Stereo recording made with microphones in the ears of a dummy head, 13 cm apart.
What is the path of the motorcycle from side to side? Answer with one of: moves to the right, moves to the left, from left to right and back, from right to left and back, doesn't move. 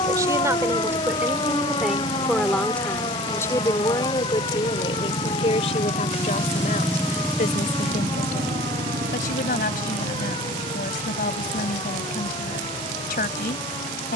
moves to the right.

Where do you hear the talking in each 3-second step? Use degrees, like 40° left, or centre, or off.
10° right, 40° left, 60° left, 70° left, 70° left.